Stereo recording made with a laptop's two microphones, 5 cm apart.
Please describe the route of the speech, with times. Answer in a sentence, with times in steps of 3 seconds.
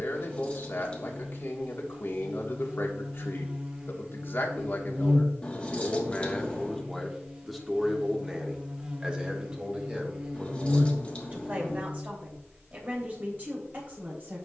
In this clip you hear the speech on the left from 0 s, in the centre from 6 s and on the right from 9 s.